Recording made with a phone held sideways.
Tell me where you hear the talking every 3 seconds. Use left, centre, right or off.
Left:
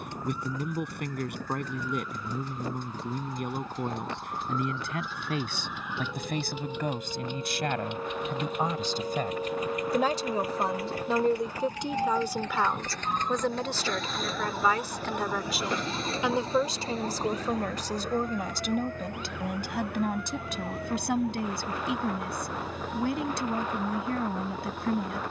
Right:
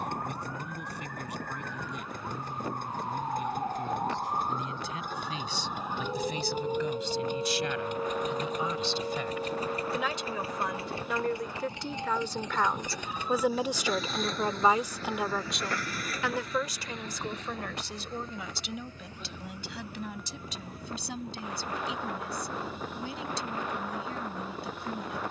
left, left, left, left, centre, left, left, left, left.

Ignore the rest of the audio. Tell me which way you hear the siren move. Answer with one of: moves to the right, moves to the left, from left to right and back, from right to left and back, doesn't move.
moves to the left.